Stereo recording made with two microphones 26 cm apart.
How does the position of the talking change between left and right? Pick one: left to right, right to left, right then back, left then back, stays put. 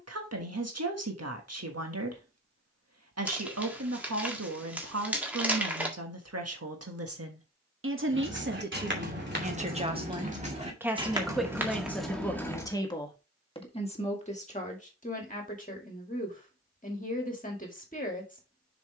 right to left.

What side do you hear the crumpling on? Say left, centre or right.
centre.